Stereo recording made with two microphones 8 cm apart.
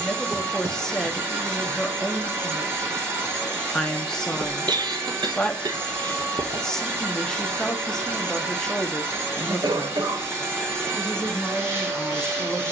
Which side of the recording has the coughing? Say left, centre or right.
right.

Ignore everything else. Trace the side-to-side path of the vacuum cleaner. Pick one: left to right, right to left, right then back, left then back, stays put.
stays put.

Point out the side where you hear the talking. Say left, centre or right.
centre.